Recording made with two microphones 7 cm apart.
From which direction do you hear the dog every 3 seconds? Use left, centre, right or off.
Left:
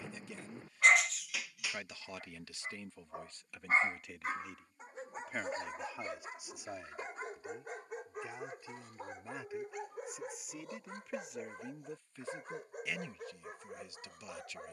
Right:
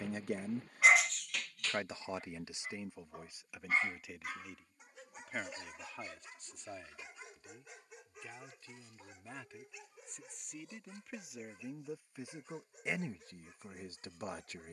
centre, left, left, left, left.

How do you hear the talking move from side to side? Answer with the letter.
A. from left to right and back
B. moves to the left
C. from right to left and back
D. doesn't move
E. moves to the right
C.